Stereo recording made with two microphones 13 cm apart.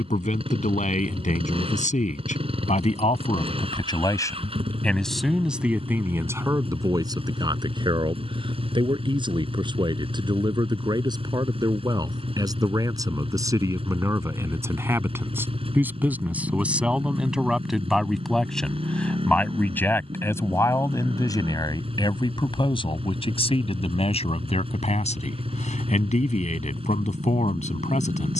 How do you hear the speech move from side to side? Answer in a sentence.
In this clip you hear the speech go right and come back.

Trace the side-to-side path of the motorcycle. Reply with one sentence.
In this clip you hear the motorcycle stay put.